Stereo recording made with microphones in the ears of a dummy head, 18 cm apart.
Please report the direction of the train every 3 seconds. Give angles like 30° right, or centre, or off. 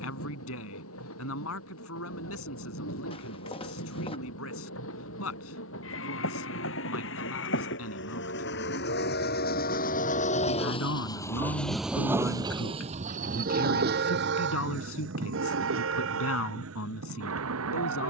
80° left, 70° left, 60° left, 30° left, 40° right, 70° right.